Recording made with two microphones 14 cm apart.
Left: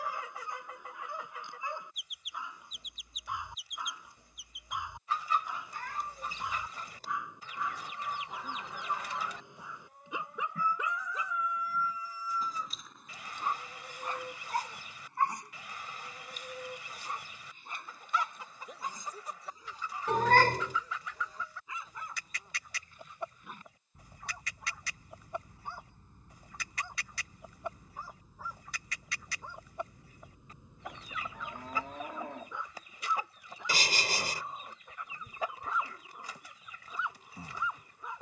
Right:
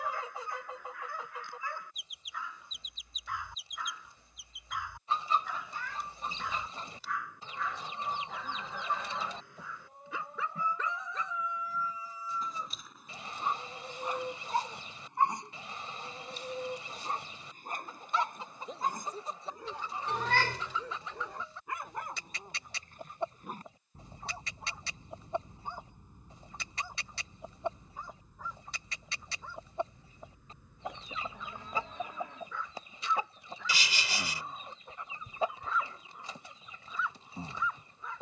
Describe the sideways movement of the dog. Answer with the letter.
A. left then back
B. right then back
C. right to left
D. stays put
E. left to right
B.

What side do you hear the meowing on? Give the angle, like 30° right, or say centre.
50° left.